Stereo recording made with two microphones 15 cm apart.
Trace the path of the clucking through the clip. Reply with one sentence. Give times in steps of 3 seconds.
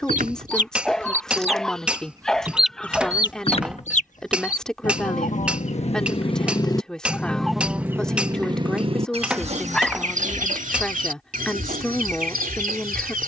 You can hear the clucking on the right from 0 s, on the left from 3 s, in the centre from 6 s and on the right from 9 s.